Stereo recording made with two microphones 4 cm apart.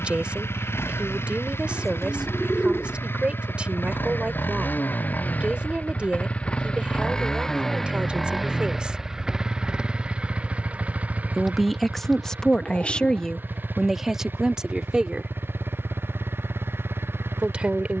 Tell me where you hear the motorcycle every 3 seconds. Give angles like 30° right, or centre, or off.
70° left, 50° left, 10° left, 30° right, 50° right, 60° right.